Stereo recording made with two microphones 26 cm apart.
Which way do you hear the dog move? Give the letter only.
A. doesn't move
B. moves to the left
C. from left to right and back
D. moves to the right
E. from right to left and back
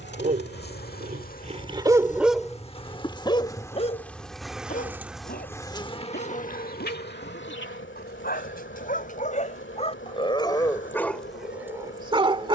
E.